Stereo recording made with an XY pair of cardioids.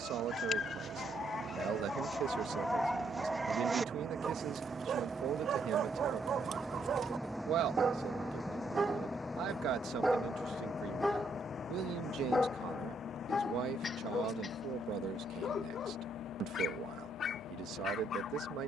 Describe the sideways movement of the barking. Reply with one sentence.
You can hear the barking go right and come back.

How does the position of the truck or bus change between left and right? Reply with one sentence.
You can hear the truck or bus travel towards the left.